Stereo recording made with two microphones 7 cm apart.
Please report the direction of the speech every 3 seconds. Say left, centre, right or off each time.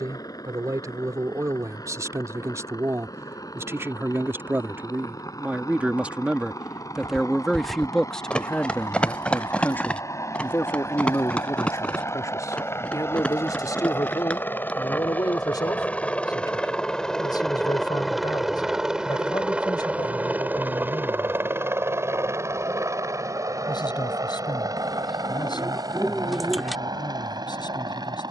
right, right, centre, left, left, left, left, left, left, left.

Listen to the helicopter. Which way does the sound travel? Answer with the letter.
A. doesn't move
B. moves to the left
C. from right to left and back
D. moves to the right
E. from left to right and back
D.